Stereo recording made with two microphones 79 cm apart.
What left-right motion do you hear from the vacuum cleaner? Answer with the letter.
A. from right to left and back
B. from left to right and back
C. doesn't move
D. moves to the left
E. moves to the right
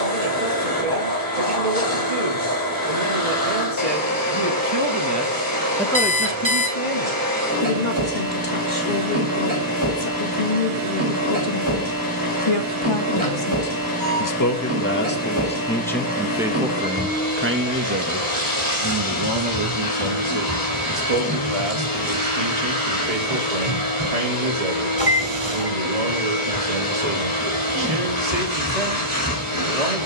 C.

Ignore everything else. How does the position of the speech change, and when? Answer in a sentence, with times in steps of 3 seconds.
In this clip you hear the speech on the right from 0 s, on the left from 6 s, in the centre from 15 s and on the right from 18 s.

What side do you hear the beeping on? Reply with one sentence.
You can hear the beeping in the centre.